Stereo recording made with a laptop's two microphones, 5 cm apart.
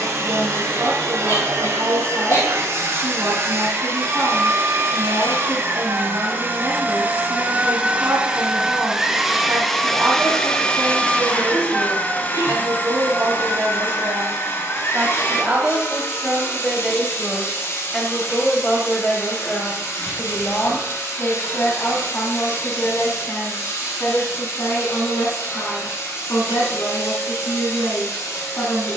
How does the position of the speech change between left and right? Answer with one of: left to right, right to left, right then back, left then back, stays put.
right to left.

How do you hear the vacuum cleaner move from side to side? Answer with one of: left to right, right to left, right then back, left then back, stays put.
right to left.